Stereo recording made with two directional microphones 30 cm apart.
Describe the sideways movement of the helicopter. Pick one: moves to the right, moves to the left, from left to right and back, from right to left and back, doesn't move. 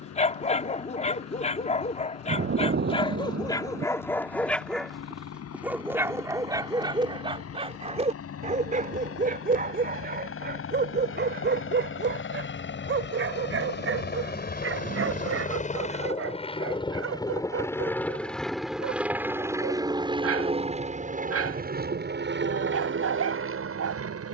moves to the right.